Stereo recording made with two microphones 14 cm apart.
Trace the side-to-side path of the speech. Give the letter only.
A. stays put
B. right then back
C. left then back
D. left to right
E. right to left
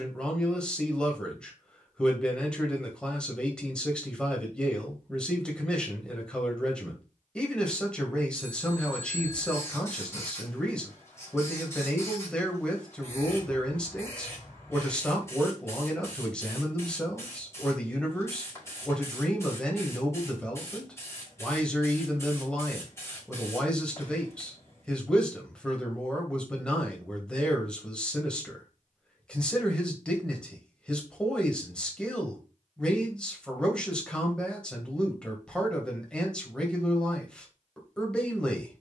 A.